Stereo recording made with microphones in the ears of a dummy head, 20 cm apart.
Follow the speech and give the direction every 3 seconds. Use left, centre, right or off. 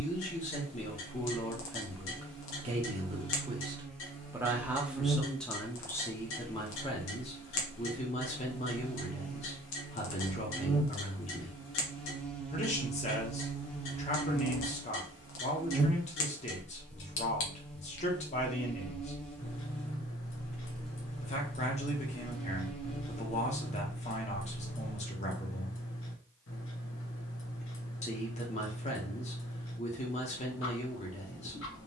centre, centre, left, left, left, left, left, left, left, left, left.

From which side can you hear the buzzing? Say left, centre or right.
centre.